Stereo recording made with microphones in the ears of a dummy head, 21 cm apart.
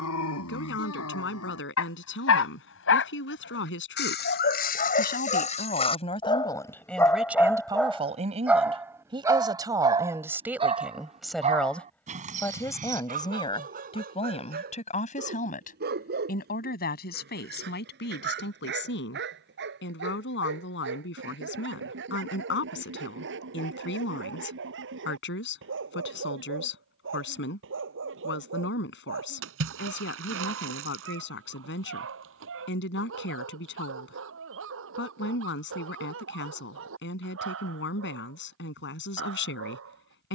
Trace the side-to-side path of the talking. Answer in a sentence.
You can hear the talking go right and come back.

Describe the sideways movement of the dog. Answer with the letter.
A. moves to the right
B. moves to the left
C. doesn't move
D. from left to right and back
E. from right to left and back
A.